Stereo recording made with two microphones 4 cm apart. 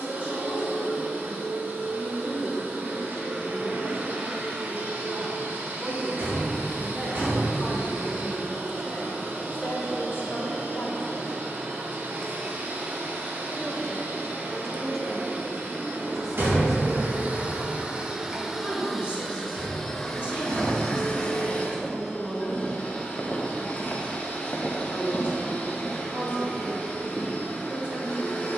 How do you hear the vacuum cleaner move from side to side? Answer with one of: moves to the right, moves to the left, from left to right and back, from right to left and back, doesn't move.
moves to the left.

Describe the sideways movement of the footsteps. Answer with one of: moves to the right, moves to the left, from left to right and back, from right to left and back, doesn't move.
from right to left and back.